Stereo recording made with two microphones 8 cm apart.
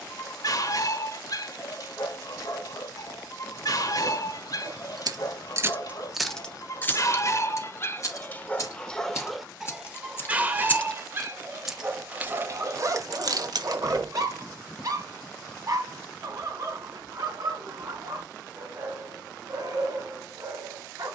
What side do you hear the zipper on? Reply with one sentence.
You can hear the zipper on the right.